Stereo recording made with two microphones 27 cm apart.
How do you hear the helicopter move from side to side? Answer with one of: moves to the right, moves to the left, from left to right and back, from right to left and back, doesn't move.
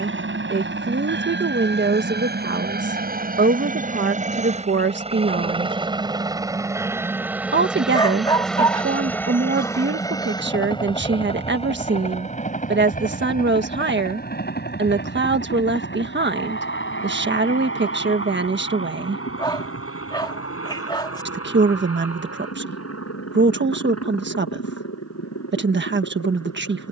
moves to the left.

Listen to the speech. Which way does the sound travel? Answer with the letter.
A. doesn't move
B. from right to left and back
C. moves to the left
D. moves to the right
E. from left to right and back
A.